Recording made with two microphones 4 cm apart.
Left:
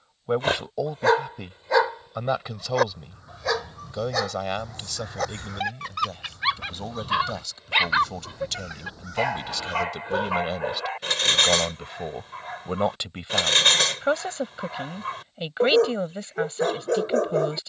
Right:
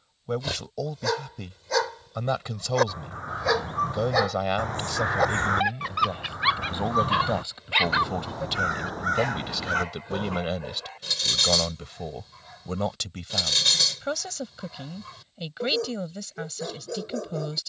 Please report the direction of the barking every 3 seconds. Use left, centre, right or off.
left, centre, centre, left, left, left.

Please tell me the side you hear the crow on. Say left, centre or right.
right.